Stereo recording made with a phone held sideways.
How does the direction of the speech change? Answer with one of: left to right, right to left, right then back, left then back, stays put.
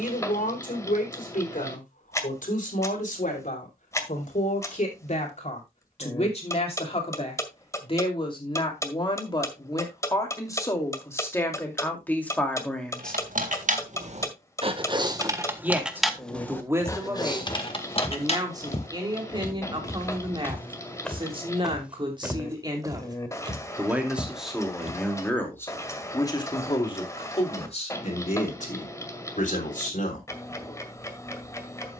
right then back.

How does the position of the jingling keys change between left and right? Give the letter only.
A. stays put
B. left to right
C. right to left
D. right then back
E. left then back
C.